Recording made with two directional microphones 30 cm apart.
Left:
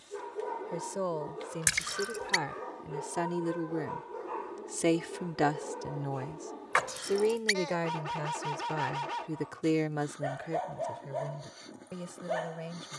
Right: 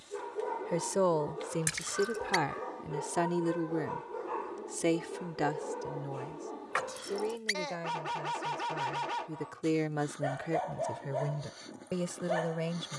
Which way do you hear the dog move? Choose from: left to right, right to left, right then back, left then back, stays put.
stays put.